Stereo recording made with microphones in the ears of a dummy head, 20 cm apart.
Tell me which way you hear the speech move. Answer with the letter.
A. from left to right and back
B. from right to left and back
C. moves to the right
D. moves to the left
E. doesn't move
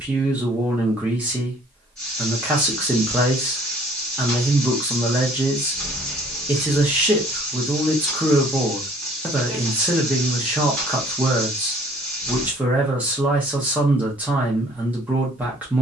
E.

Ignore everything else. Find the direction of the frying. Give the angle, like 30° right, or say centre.
centre.